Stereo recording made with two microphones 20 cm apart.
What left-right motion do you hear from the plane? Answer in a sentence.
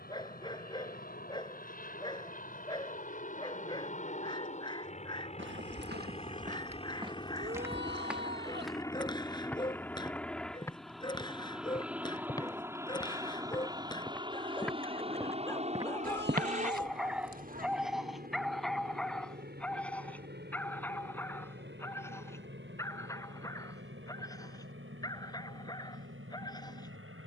You can hear the plane go from the left side to the right.